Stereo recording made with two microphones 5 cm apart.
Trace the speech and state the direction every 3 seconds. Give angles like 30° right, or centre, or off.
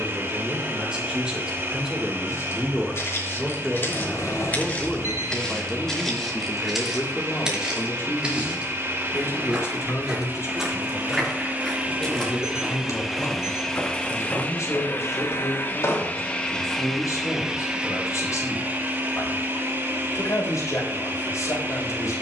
10° right, 10° left, 40° left, 60° left, 70° left, 80° left, 80° left, 80° left.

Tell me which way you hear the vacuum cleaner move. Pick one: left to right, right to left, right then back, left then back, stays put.
left then back.